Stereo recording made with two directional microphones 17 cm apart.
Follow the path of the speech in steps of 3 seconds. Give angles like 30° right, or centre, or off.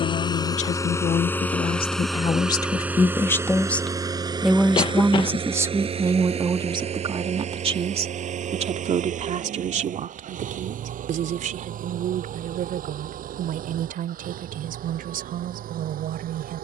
40° left, centre, 30° right, 50° right, 60° right, 60° right.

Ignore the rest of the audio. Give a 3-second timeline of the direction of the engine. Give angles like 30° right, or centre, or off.
10° left, 30° right, 40° right, 50° right, 60° right, 60° right.